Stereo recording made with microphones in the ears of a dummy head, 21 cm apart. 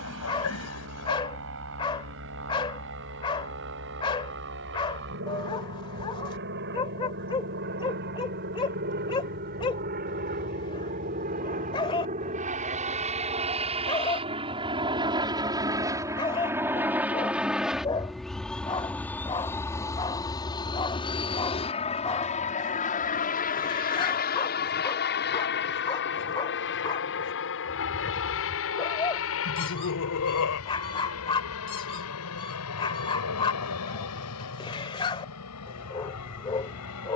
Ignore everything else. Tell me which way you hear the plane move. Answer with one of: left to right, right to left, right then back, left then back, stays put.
right to left.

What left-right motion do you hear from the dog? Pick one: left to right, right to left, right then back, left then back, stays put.
stays put.